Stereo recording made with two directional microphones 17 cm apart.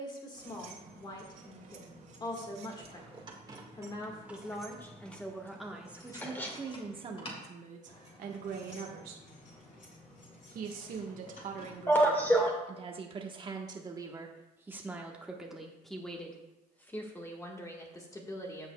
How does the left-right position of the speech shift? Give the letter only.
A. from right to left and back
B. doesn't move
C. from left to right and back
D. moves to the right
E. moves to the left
C.